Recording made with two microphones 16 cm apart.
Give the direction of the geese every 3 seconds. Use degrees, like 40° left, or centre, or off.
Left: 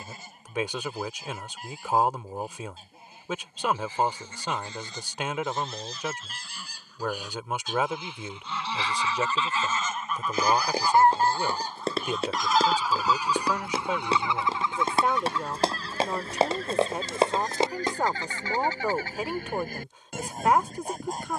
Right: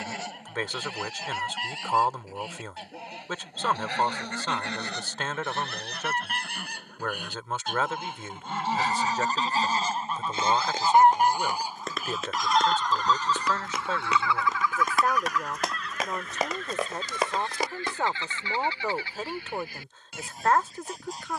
80° right, 70° right, 60° right, 30° right, 10° left, 40° left, 50° left.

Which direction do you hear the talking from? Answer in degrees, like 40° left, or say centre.
10° left.